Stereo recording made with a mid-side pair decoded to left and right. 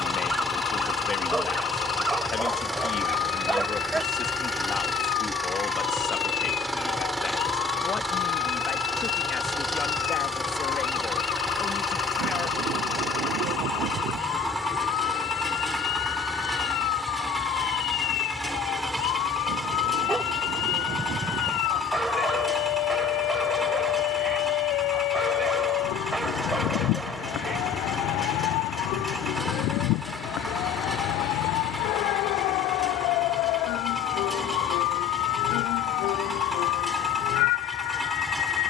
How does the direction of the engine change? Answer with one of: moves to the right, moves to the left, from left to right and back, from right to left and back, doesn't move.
doesn't move.